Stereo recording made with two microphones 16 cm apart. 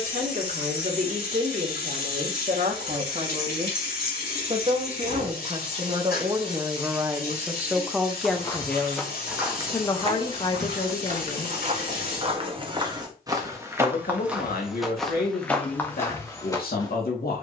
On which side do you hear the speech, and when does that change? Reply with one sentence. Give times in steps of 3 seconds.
You can hear the speech on the right from 0 s, in the centre from 6 s and on the left from 9 s.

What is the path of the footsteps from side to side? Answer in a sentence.
You can hear the footsteps go right and come back.